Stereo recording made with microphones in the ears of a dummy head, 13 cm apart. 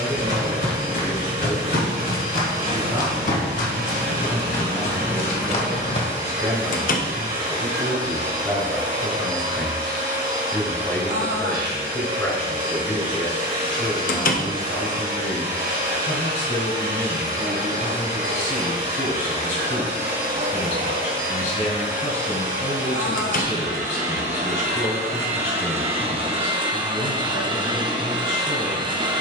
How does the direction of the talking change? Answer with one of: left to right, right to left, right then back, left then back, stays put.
right to left.